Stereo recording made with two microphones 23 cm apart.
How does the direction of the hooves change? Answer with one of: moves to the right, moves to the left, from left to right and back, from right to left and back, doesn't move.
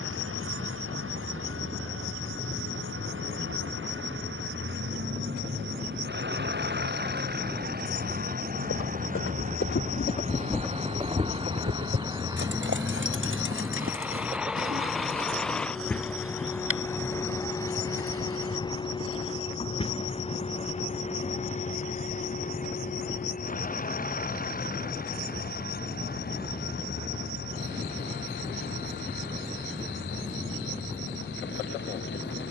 moves to the right.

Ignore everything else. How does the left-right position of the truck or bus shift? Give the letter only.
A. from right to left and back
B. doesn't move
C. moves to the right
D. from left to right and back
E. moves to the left
E.